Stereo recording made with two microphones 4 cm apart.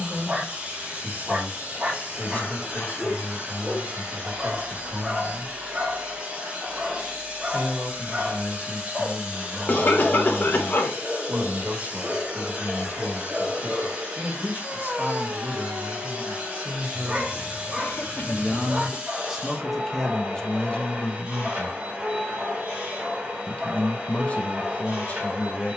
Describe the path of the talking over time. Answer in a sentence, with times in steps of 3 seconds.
In this clip you hear the talking on the right from 0 s, in the centre from 18 s and on the left from 21 s.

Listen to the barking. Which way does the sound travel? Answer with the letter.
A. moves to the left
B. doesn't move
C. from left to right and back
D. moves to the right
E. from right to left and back
B.